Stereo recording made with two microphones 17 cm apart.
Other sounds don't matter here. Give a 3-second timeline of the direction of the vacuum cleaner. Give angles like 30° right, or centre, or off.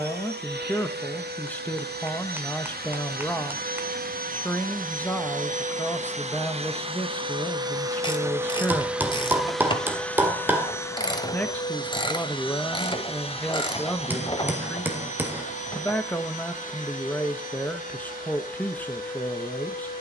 70° right, 60° right, 30° right, 10° left, 40° left, 50° left, 50° left.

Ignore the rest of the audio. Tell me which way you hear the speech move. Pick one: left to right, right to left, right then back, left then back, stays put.
stays put.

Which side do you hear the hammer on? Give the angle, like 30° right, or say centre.
10° right.